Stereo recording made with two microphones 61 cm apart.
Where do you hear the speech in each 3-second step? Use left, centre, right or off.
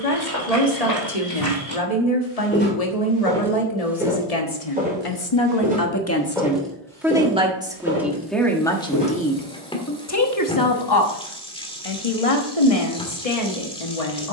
left, left, centre, left, left.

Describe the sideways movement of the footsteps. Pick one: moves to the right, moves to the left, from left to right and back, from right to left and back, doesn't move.
from left to right and back.